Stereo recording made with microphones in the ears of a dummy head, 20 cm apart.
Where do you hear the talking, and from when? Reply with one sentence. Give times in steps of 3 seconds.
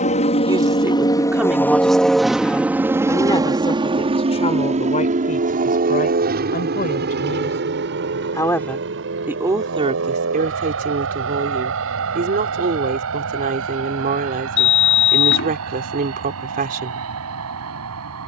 In this clip you hear the talking in the centre from 0 s, on the left from 3 s and on the right from 9 s.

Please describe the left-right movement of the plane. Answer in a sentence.
In this clip you hear the plane move to the right.